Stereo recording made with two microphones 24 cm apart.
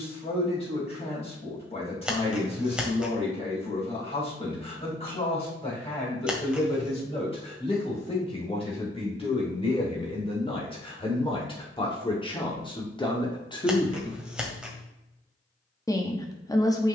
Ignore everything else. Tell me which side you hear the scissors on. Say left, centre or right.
centre.